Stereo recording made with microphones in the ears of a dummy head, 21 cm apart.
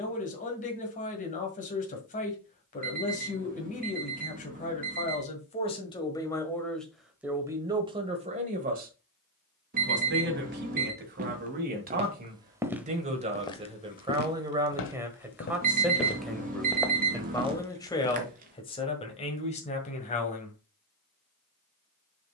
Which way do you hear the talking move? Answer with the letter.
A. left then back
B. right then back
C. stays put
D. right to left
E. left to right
B.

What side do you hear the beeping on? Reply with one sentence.
You can hear the beeping on the right.